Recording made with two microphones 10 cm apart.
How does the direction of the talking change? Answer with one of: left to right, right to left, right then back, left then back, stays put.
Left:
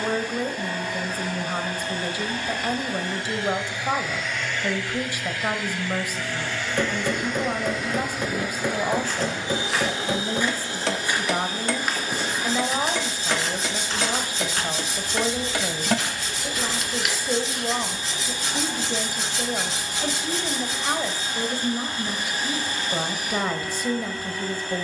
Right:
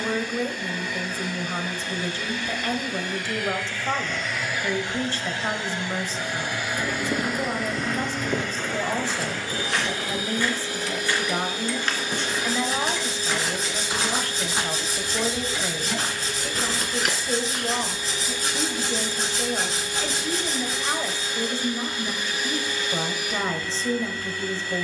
stays put.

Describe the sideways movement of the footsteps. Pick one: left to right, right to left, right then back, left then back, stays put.
left then back.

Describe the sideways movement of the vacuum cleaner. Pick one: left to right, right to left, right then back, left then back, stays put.
right then back.